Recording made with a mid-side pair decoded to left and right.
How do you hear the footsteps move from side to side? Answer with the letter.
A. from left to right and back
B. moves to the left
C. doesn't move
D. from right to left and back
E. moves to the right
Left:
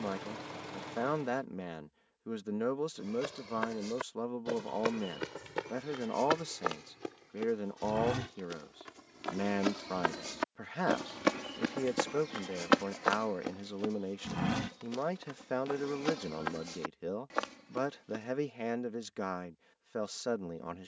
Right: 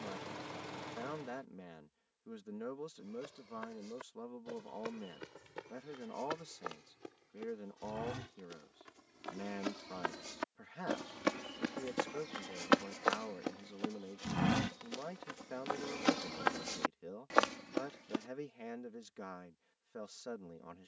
E.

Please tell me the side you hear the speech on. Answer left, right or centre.
left.